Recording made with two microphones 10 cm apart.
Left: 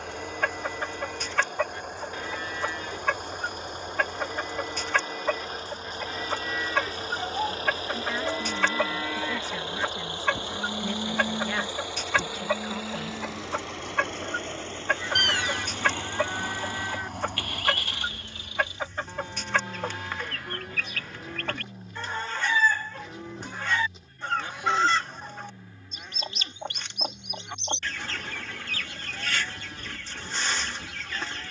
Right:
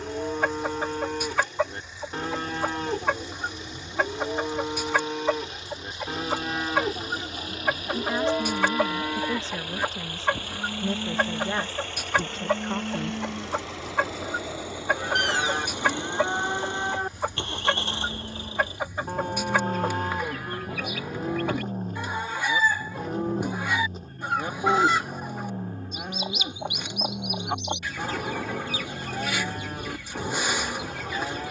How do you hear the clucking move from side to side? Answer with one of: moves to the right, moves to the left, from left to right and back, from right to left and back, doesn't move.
doesn't move.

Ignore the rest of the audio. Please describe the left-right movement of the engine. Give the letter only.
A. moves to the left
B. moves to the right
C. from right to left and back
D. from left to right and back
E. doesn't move
B.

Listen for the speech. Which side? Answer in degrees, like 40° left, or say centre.
30° right.